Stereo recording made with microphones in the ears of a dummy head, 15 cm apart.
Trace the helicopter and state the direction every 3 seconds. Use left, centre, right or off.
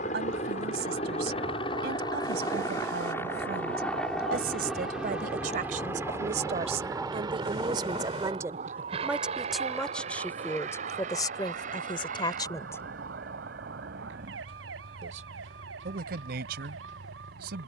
left, centre, right, right, right, right.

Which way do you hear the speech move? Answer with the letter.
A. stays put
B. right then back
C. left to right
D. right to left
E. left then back
E.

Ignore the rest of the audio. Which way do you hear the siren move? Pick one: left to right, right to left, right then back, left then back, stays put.
left to right.